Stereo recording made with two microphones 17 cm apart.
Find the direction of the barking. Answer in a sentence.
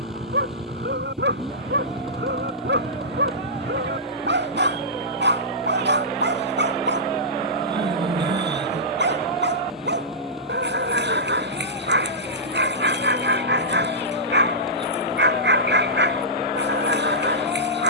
You can hear the barking on the right.